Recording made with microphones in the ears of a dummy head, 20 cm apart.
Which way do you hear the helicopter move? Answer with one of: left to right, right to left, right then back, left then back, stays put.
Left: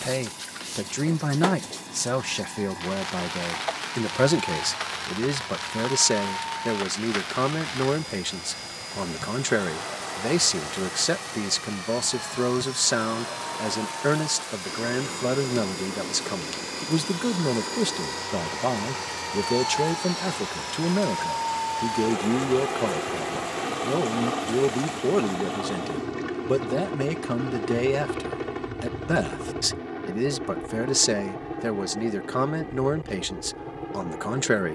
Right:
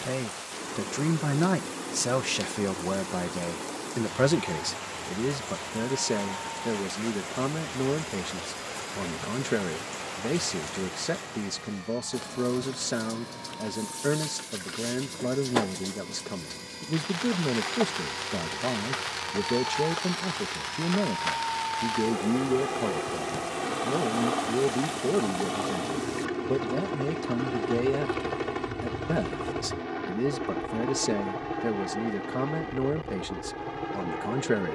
left to right.